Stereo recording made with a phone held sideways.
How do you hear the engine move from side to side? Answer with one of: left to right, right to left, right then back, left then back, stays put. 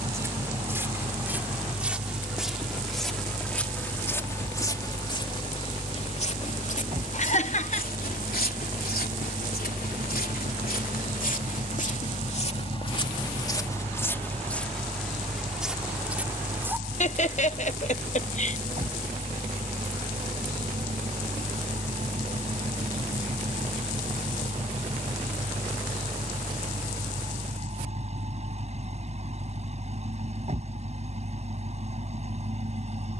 stays put.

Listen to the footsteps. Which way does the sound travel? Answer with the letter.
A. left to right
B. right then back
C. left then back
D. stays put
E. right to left
C.